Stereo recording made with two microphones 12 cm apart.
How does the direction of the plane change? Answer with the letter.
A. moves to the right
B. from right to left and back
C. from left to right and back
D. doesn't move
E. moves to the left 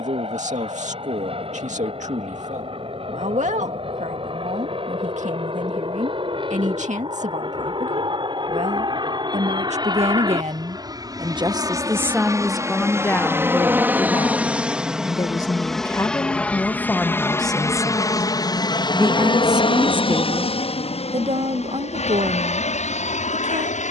E.